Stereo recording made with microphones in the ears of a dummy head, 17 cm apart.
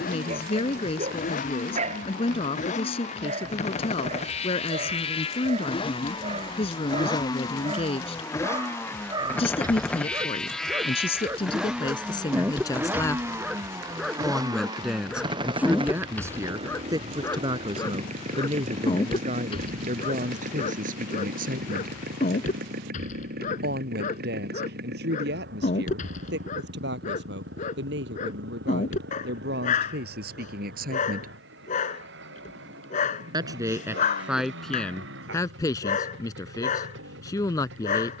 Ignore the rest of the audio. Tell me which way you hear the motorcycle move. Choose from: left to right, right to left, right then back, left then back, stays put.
left to right.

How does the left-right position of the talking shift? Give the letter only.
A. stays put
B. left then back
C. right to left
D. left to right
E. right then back
E.